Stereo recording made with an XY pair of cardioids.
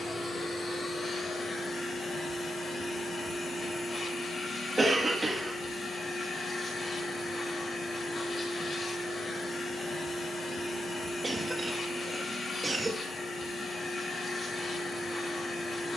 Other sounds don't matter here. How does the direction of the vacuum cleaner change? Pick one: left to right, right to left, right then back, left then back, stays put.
stays put.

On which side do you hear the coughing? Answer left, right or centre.
right.